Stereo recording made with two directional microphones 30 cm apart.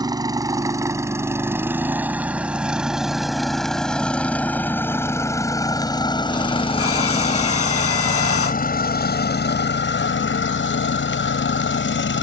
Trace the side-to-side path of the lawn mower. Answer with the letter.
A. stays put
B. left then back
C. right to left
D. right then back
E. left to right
C.